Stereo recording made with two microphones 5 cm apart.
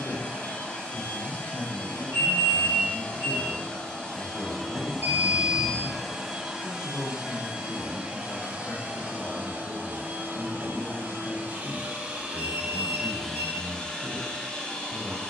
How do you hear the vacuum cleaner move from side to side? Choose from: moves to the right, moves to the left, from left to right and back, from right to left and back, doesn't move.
from left to right and back.